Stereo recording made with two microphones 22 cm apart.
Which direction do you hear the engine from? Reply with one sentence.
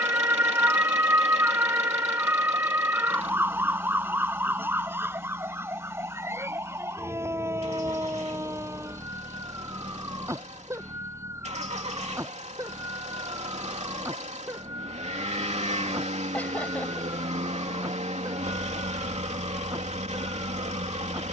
You can hear the engine on the right.